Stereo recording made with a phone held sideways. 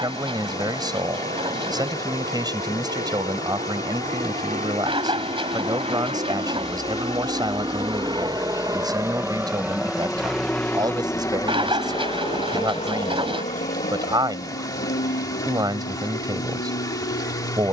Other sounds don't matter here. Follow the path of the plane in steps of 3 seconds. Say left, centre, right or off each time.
right, right, right, centre, left, left.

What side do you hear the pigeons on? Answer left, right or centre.
right.